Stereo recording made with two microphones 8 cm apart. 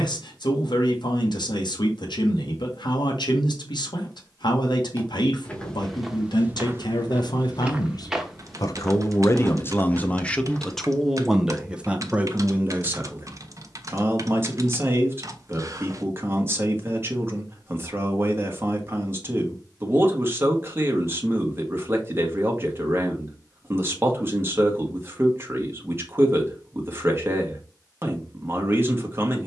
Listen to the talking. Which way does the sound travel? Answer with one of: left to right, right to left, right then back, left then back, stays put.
left to right.